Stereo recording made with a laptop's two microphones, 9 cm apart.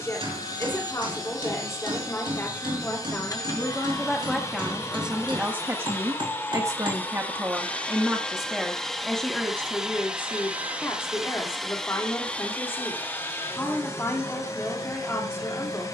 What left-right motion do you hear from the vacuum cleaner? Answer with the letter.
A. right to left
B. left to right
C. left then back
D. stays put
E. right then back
E.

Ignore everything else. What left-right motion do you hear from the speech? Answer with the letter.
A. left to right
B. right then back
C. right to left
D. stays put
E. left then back
B.